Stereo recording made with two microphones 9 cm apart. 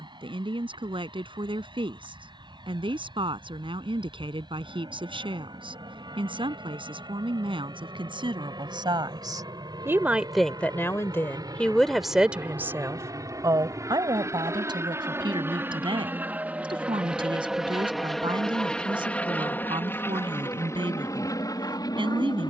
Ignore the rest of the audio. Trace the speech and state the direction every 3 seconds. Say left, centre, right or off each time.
right, right, right, centre, right, right, right, right.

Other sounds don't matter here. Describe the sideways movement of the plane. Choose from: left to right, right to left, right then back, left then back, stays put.
right to left.